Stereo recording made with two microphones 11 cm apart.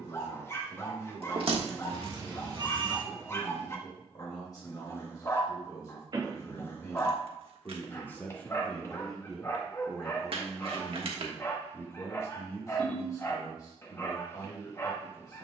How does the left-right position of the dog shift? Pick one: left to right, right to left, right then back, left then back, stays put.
stays put.